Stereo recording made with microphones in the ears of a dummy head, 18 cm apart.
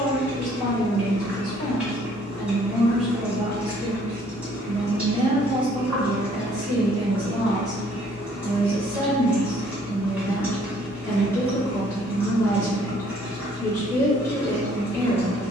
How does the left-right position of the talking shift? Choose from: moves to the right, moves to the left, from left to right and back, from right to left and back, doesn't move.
from left to right and back.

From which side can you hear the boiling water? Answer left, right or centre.
centre.